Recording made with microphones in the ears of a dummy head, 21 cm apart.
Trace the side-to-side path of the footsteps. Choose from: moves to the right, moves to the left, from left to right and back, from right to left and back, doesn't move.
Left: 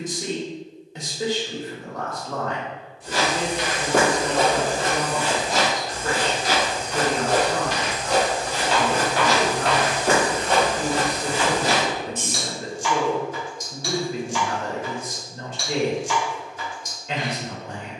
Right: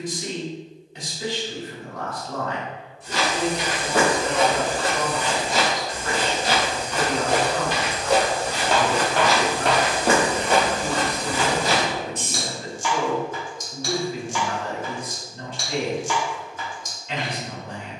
from left to right and back.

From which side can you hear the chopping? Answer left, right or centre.
right.